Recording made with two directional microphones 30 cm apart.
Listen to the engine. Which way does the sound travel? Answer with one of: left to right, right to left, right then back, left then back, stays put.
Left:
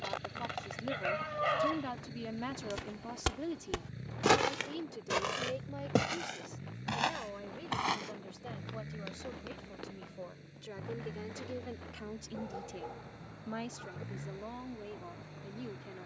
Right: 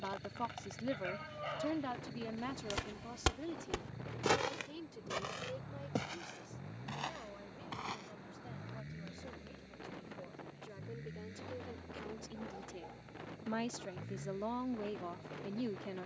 stays put.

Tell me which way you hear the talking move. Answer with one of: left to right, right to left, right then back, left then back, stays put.
left then back.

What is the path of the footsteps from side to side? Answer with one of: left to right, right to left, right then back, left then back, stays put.
right to left.